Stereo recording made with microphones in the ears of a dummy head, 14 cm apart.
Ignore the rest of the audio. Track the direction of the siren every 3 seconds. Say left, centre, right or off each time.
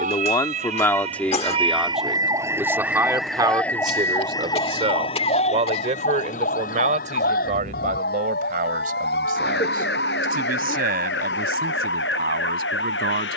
right, left, left, left, left.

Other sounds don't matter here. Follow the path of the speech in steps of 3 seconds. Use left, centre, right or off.
centre, right, right, right, right.